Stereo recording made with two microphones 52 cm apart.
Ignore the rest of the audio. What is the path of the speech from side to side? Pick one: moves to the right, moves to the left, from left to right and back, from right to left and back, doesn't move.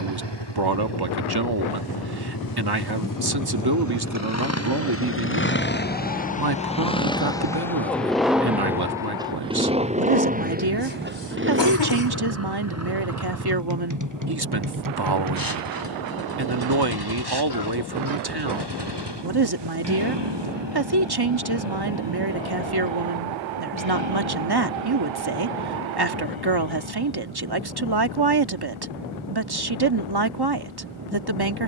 doesn't move.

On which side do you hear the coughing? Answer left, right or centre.
left.